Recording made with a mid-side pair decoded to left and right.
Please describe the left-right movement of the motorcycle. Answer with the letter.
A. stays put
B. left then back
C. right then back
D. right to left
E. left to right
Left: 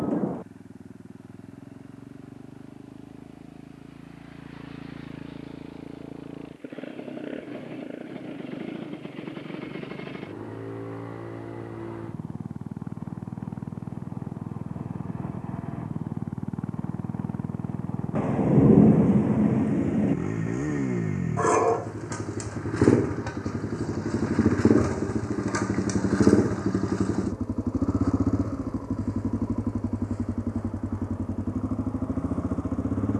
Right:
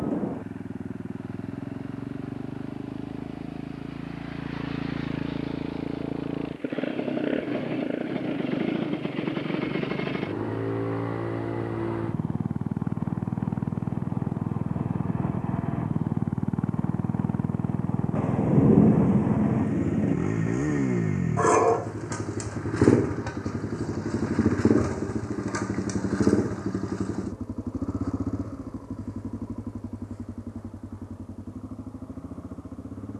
D.